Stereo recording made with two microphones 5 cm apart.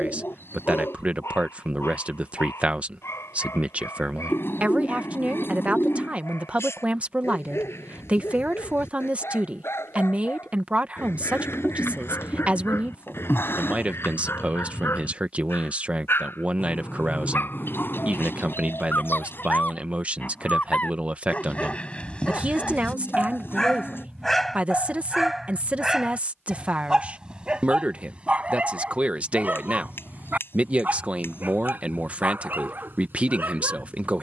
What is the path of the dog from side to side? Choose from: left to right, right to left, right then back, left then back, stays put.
left to right.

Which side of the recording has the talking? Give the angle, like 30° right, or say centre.
30° right.